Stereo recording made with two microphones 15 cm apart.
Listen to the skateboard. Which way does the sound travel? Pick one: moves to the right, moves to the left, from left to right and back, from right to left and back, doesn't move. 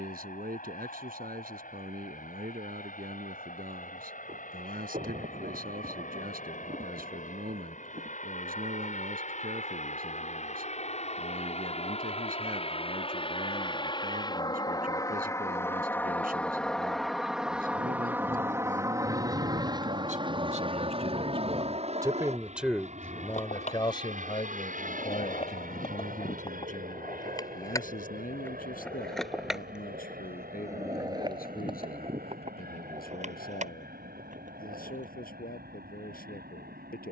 moves to the right.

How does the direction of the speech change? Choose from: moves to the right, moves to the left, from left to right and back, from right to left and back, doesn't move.
moves to the left.